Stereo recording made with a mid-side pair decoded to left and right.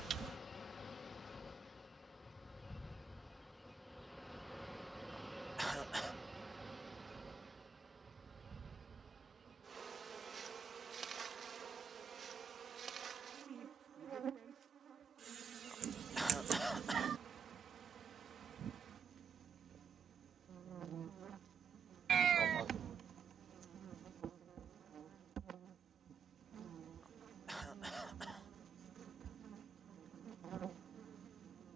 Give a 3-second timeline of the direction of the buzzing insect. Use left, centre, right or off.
left, centre, right, right, right, right, right, right, right, right, right.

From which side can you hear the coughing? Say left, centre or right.
centre.